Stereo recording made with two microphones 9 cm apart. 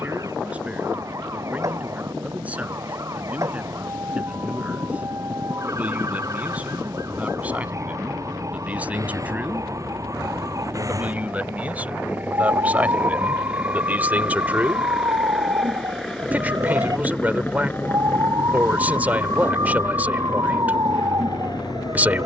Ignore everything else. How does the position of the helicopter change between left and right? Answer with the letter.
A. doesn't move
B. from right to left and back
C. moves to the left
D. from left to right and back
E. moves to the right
C.